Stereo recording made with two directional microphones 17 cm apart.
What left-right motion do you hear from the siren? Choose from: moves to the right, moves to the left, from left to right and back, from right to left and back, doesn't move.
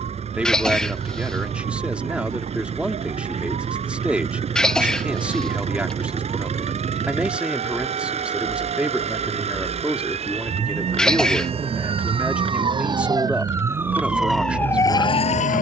moves to the left.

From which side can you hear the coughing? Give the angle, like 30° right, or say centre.
centre.